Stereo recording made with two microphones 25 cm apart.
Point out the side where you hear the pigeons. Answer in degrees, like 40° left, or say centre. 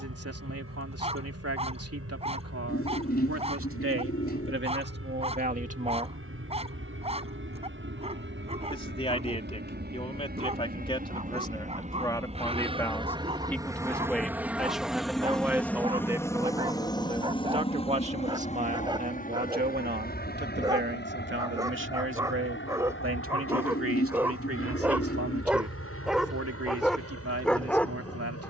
40° left.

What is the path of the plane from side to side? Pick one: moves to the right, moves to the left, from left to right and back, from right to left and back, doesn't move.
moves to the left.